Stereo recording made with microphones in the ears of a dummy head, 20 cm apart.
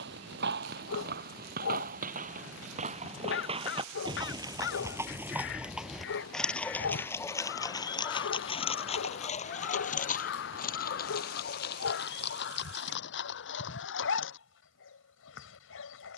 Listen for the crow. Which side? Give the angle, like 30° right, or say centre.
50° left.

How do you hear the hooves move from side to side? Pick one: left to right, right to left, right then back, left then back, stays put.
right to left.